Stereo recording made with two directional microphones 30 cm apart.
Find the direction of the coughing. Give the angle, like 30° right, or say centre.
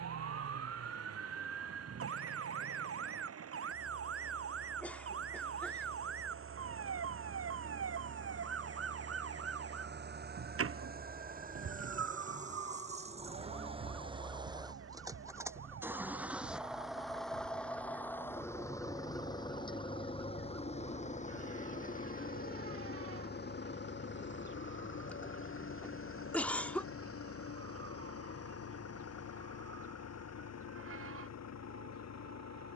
centre.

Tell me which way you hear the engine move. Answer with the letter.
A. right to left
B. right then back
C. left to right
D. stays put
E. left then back
A.